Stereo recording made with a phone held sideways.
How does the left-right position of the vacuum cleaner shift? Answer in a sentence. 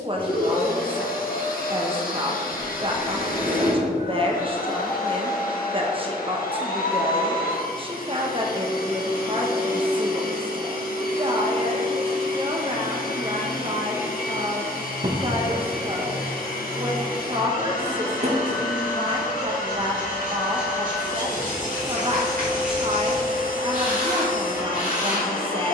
In this clip you hear the vacuum cleaner stay put.